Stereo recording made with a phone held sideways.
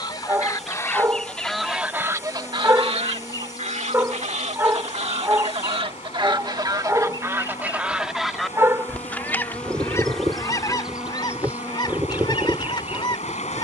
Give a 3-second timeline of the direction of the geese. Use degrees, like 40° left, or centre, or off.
centre, 60° right, 20° right, 30° left, 40° left.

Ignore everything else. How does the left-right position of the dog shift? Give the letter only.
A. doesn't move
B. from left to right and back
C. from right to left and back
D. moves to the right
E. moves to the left
A.